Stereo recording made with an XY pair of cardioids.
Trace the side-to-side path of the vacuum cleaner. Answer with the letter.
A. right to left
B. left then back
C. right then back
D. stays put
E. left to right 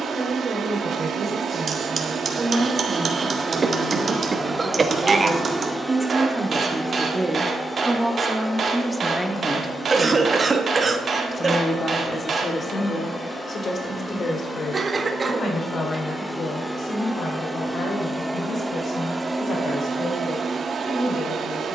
B.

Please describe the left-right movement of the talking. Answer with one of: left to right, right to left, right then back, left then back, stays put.
right to left.